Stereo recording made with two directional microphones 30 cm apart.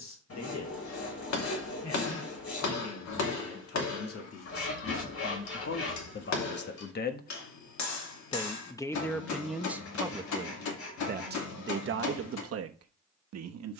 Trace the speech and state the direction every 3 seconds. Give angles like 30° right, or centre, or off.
60° left, 50° left, 30° left, 20° right, 50° right.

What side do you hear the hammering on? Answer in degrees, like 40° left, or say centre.
70° left.